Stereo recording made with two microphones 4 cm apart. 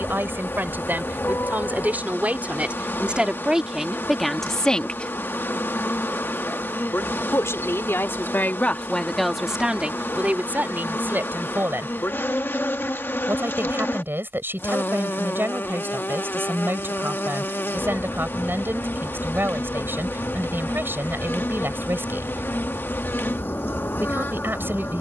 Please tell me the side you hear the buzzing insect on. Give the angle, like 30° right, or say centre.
50° left.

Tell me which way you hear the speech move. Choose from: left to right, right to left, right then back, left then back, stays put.
left then back.